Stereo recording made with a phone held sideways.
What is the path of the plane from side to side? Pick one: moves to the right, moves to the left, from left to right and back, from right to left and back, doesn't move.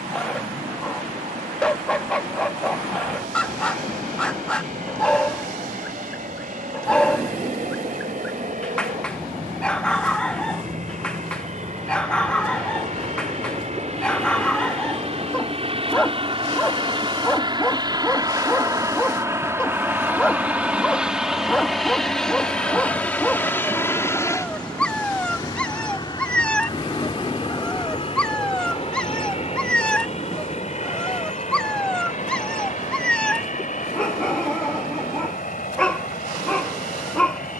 moves to the left.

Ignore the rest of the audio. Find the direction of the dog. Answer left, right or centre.
centre.